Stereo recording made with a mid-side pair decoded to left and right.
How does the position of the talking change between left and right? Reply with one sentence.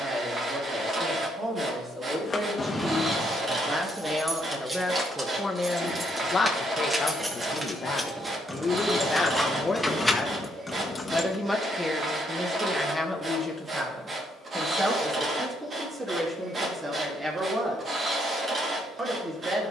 You can hear the talking move from right to left and back again.